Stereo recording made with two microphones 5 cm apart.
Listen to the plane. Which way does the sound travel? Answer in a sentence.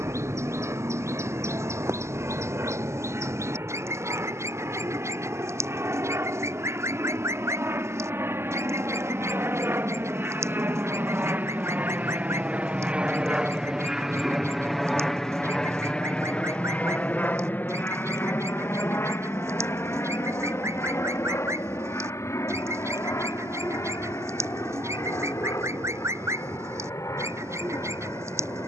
In this clip you hear the plane move to the left.